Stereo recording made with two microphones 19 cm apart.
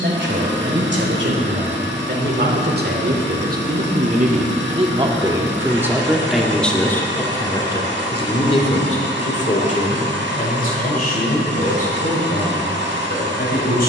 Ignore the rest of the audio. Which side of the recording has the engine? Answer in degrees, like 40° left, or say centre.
70° right.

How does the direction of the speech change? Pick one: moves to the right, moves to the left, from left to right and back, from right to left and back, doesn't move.
moves to the left.